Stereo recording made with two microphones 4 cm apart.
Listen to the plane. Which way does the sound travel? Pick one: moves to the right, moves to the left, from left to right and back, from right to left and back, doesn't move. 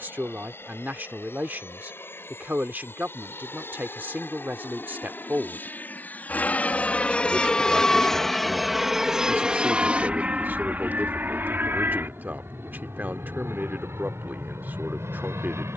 moves to the right.